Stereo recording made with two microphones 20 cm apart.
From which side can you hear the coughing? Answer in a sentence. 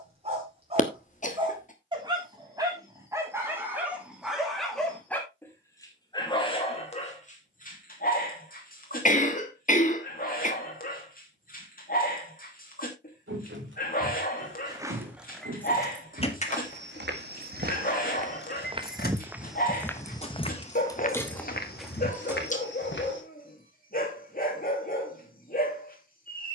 In this clip you hear the coughing on the left.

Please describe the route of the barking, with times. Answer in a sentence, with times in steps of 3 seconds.
In this clip you hear the barking on the right from 0 s, in the centre from 3 s and on the left from 6 s.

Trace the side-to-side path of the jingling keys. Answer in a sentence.
In this clip you hear the jingling keys go left and come back.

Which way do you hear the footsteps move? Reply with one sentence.
You can hear the footsteps move from right to left.